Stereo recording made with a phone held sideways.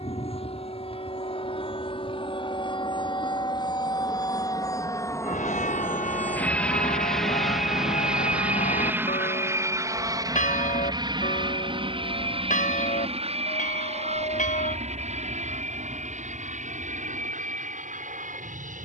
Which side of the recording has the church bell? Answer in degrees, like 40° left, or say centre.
70° left.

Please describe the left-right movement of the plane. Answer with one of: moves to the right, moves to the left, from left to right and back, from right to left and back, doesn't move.
moves to the right.